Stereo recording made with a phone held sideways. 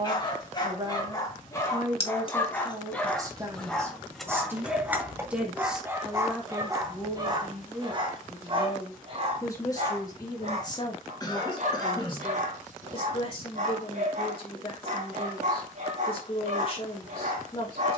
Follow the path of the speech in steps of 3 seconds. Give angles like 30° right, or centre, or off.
30° right, 20° right, 10° left, 30° left, 40° left, 40° left.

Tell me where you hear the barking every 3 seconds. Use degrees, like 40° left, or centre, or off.
20° left, centre, 30° right, 50° right, 50° right, 50° right.